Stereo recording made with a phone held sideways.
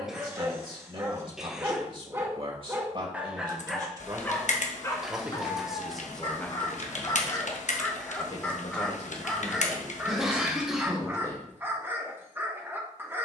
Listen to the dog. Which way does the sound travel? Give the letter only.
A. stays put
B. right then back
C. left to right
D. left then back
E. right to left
D.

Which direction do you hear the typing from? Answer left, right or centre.
left.